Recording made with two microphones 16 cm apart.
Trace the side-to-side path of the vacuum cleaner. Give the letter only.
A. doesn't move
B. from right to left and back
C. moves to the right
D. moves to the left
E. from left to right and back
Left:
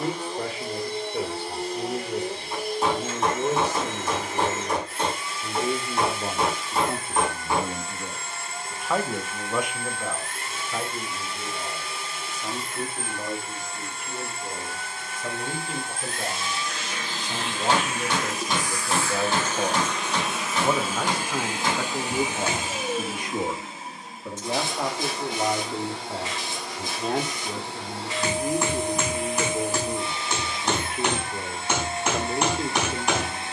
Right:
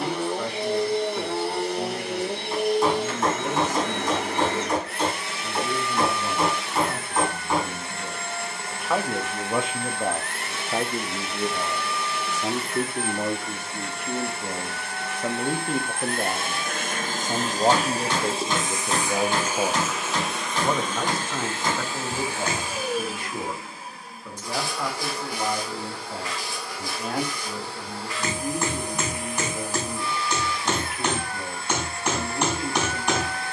D.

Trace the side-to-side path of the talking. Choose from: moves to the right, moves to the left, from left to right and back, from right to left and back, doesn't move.
from left to right and back.